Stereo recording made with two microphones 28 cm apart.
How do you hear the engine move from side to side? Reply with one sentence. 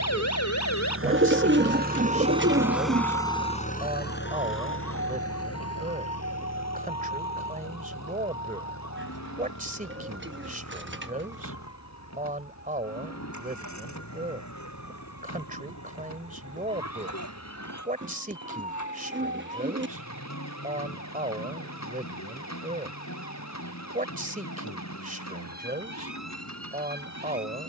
In this clip you hear the engine travel towards the left.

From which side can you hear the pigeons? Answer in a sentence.
In this clip you hear the pigeons on the right.